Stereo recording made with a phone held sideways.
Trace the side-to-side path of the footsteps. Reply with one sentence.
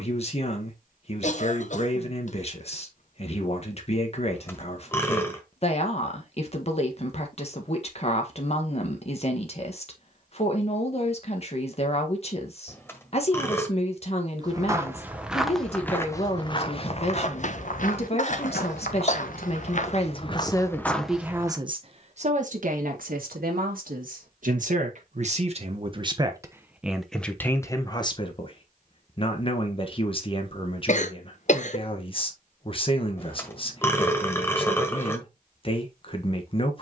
You can hear the footsteps move from right to left and back again.